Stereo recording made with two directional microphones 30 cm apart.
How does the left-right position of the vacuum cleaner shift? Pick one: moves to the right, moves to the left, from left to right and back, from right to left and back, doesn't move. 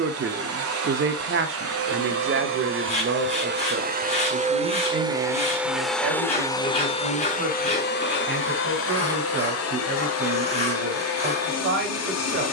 moves to the left.